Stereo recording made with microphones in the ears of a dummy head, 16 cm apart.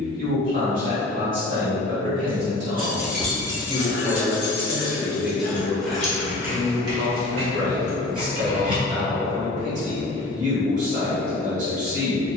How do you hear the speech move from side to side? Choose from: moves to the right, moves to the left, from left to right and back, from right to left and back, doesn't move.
from right to left and back.